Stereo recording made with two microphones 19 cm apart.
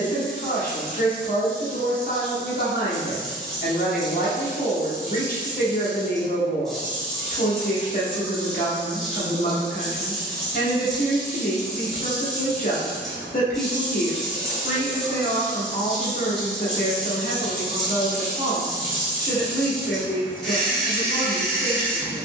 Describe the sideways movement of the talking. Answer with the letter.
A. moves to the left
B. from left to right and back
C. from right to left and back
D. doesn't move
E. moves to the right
D.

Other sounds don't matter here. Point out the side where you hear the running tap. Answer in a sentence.
You can hear the running tap in the centre.